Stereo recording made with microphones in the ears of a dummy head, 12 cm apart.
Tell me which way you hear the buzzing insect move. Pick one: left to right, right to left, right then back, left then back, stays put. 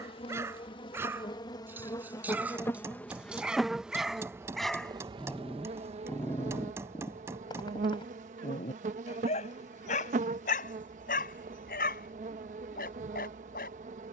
left to right.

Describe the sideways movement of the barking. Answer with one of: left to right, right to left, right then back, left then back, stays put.
right to left.